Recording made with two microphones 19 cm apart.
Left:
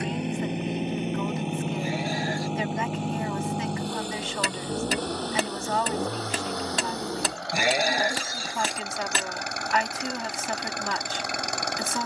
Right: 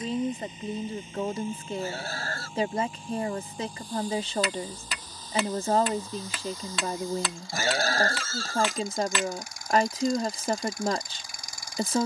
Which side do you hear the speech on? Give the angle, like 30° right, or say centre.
40° right.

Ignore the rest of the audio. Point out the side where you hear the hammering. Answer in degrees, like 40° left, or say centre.
40° left.